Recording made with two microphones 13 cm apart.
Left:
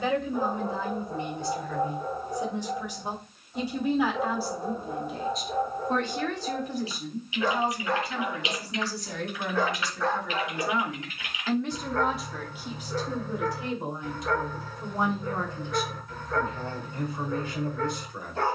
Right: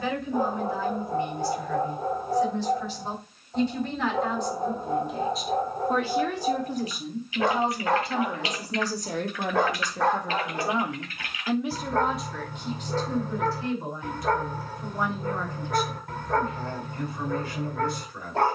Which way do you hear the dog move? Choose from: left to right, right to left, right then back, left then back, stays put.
stays put.